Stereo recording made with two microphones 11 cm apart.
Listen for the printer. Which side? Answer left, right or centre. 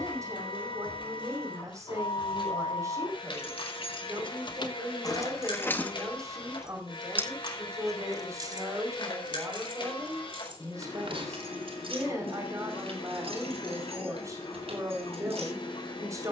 left.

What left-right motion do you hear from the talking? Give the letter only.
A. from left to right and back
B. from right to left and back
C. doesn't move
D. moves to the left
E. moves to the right
C.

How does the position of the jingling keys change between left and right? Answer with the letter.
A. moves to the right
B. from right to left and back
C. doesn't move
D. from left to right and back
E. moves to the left
A.